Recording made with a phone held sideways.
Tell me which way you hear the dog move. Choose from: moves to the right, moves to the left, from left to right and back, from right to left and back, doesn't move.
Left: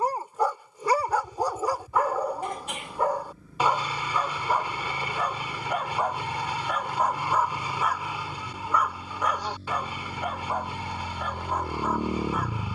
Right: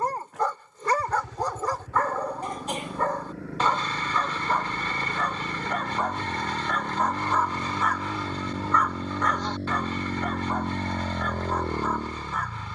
doesn't move.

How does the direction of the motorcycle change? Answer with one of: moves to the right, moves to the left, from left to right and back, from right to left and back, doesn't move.
moves to the left.